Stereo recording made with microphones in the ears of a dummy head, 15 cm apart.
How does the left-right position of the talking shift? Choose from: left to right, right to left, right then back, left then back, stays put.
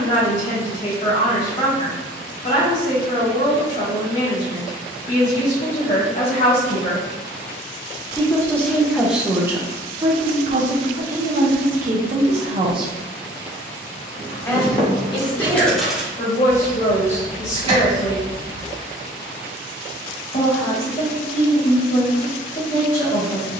right then back.